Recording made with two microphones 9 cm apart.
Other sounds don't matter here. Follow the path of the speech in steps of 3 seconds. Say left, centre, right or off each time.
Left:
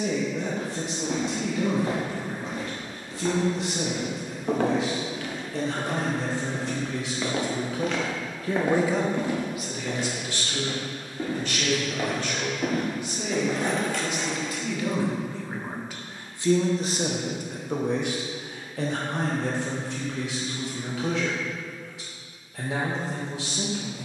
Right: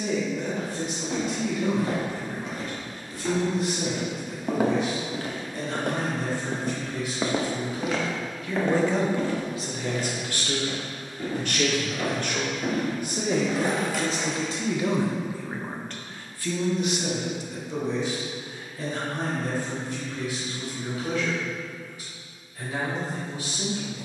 left, left, left, right, right, left, left, left.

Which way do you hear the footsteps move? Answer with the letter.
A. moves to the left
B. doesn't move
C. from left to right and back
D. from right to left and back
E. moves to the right
C.